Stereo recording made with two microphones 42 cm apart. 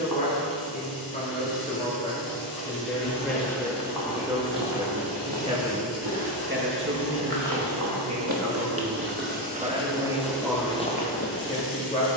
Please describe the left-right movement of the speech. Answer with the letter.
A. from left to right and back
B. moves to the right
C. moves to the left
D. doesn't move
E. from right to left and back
A.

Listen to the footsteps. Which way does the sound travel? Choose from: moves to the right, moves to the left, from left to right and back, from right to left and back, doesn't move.
from left to right and back.